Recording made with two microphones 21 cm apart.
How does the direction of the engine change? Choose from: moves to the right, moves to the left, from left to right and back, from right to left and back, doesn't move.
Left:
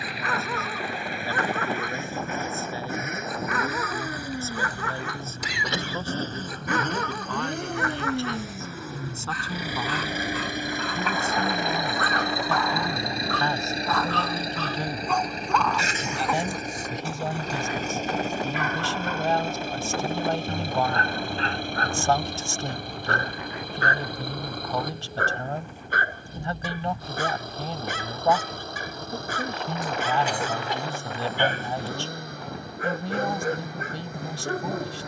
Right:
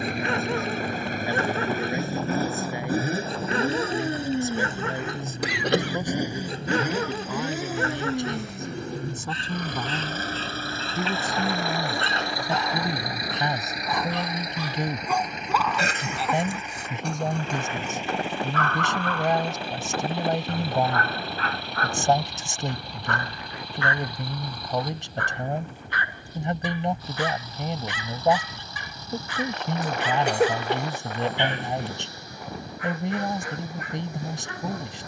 moves to the left.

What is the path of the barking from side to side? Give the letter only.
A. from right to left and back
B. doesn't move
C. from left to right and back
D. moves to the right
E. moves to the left
E.